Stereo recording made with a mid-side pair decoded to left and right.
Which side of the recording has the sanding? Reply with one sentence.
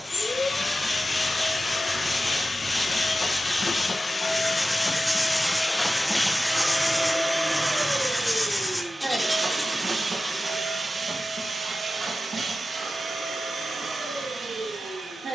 You can hear the sanding in the centre.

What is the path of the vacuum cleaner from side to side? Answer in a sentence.
In this clip you hear the vacuum cleaner move to the right.